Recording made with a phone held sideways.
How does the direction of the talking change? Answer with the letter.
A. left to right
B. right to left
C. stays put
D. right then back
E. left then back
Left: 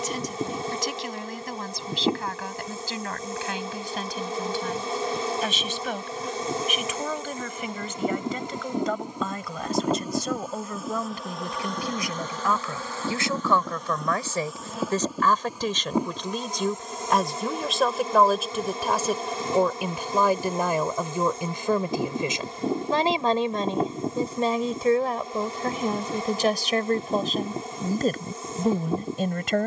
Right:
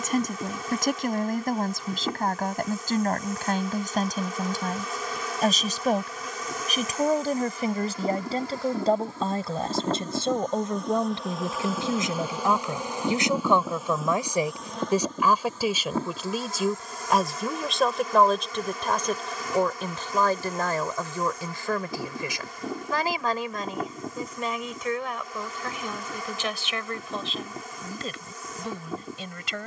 B.